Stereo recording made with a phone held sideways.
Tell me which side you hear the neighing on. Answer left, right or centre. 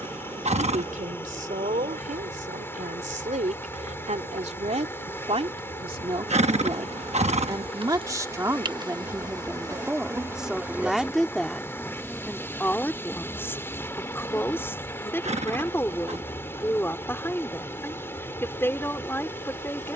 right.